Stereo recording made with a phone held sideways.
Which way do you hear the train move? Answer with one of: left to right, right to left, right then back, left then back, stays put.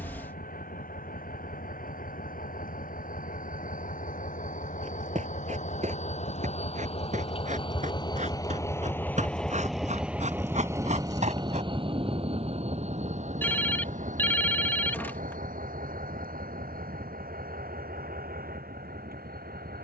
left to right.